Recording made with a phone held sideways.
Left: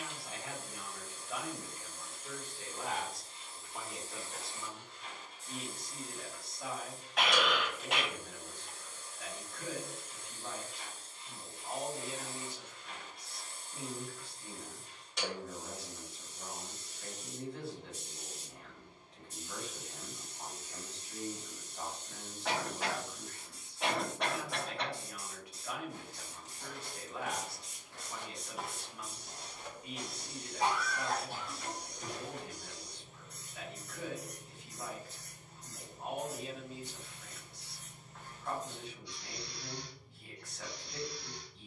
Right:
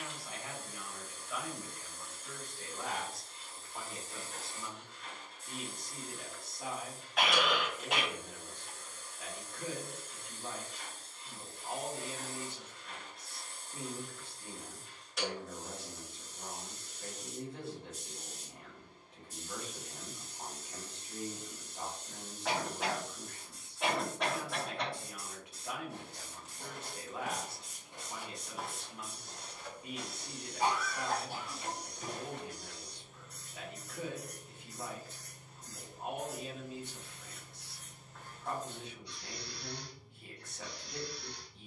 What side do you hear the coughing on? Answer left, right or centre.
centre.